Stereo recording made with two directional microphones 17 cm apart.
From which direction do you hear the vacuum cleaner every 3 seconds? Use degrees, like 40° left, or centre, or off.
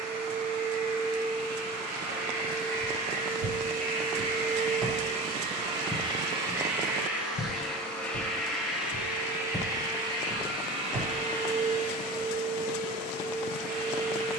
60° right, 40° right, 10° right, 30° right, 50° right.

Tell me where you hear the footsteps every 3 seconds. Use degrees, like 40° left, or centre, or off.
off, 20° right, 40° left, 10° right, off.